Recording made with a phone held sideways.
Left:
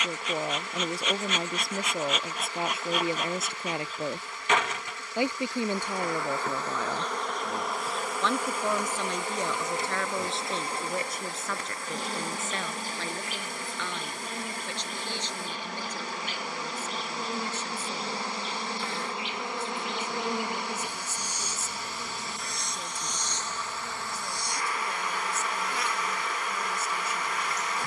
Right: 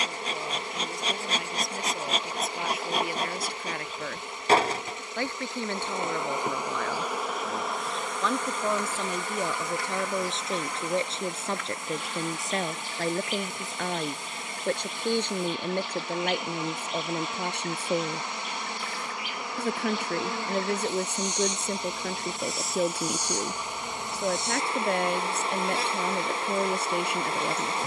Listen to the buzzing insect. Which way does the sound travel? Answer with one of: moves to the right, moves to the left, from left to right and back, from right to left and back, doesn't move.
from right to left and back.